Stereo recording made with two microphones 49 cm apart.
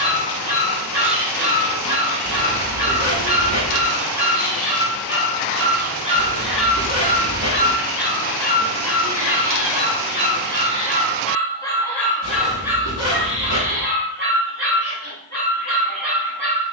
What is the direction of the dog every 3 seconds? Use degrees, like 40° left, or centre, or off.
50° right, 40° right, 20° left, 20° left, 10° right, 40° right.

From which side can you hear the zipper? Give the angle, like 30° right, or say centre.
30° right.